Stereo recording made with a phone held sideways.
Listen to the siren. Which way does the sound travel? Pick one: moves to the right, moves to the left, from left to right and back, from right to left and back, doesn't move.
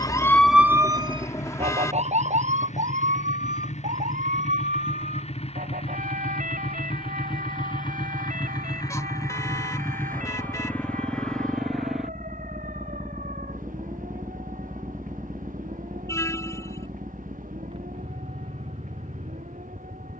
moves to the right.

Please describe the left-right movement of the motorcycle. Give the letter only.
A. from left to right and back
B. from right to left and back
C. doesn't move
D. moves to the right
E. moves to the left
D.